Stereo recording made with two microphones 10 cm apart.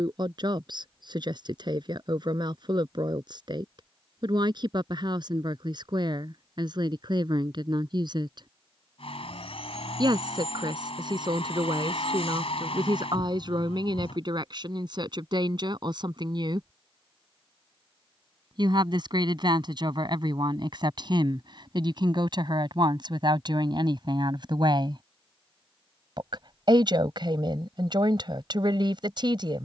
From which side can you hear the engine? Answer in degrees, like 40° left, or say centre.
70° left.